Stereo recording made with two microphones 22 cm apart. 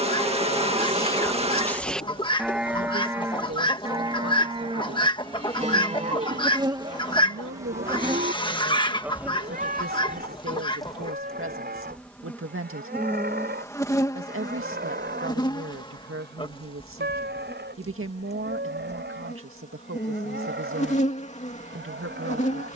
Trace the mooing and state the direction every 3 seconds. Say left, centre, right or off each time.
centre, right, right, right, right, right, right, right.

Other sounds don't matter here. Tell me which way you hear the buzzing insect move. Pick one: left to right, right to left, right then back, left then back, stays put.
right to left.